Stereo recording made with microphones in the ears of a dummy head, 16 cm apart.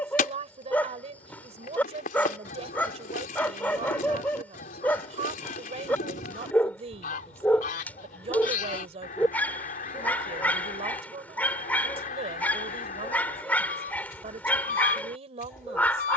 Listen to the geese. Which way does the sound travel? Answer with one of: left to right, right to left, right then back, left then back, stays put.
stays put.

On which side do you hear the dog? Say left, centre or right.
centre.